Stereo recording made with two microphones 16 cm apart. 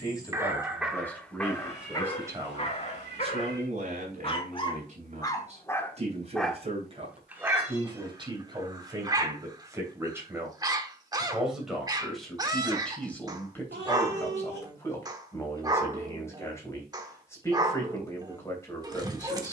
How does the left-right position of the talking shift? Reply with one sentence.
In this clip you hear the talking go right and come back.